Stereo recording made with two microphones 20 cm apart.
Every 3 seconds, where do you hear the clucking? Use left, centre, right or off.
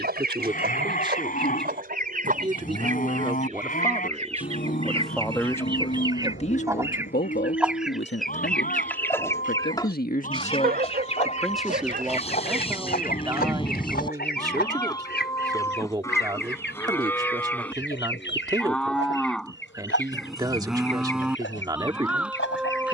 right, right, centre, left, left, left, left, left.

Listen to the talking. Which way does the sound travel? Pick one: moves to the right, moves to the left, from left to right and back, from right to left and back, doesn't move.
from right to left and back.